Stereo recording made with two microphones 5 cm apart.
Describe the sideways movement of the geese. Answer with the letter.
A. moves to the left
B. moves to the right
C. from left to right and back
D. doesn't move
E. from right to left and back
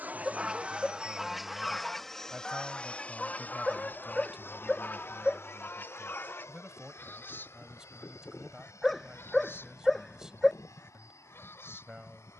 A.